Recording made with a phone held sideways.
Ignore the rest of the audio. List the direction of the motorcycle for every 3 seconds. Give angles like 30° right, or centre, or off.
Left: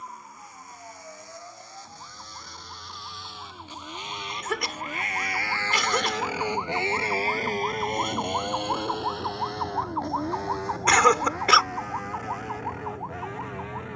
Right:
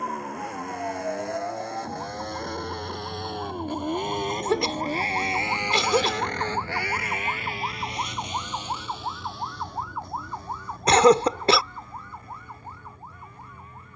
70° right, 40° right, 40° left, 70° left, 80° left.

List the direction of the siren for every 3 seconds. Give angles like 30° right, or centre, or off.
50° right, 40° right, 10° right, 30° left, 50° left.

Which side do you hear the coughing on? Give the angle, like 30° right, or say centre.
30° right.